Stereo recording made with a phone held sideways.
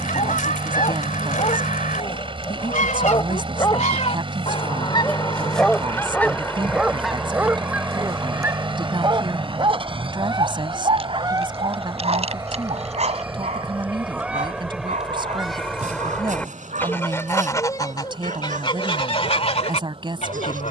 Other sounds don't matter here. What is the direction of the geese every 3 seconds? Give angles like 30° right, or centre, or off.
70° left, 40° left, centre, 20° right, 10° right, 10° left, 40° left.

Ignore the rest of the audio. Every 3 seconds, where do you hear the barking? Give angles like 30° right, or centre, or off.
40° left, 20° left, 10° right, 40° right, 50° right, 60° right, 60° right.